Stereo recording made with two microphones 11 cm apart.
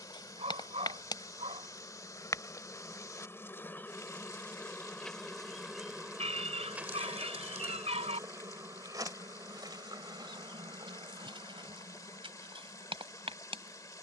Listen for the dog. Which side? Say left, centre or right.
right.